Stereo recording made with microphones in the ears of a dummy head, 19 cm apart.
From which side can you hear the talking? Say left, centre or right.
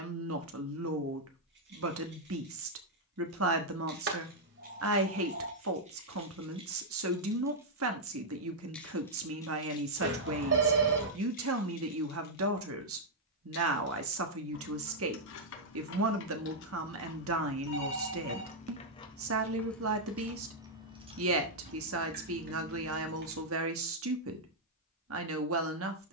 right.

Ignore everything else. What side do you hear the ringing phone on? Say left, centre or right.
right.